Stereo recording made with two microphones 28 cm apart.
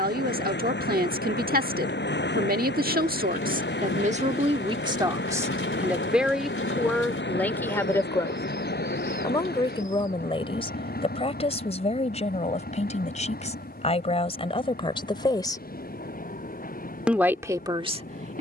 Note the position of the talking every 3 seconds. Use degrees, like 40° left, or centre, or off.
30° right, 20° right, centre, 20° left, 20° left, centre.